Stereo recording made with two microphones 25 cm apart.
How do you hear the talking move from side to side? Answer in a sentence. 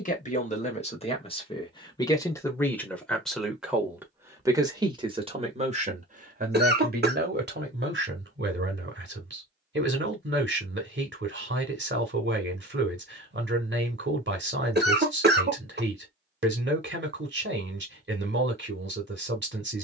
In this clip you hear the talking go from the left side to the right.